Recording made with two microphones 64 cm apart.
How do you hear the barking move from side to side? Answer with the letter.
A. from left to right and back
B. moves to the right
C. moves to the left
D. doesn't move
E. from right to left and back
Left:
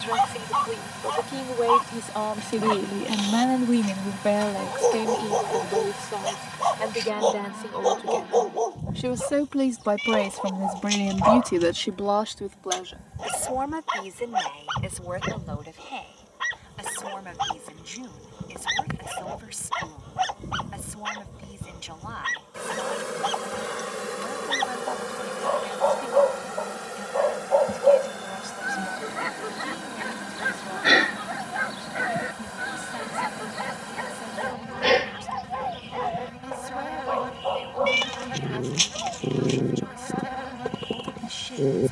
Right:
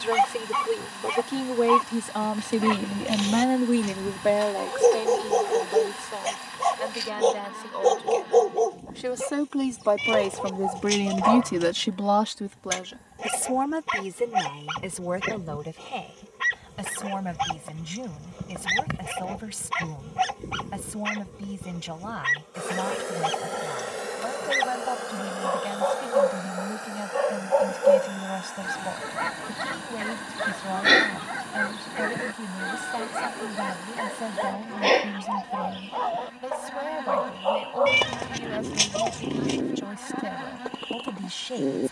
C.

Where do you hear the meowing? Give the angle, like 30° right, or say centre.
70° right.